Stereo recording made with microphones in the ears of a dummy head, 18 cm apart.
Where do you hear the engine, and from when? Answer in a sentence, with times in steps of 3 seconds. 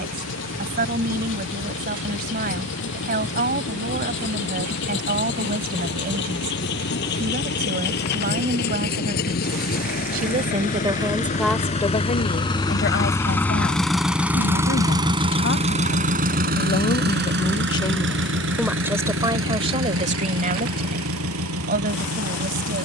In this clip you hear the engine on the left from 0 s, in the centre from 12 s and on the right from 15 s.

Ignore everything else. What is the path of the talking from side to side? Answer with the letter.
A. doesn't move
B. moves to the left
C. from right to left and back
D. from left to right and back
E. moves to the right
C.